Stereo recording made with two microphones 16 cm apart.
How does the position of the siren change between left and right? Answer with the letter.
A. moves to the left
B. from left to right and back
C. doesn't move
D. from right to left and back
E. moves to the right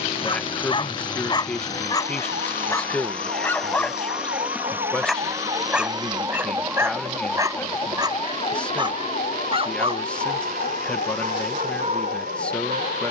A.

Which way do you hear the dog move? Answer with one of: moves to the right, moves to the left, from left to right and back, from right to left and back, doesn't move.
moves to the right.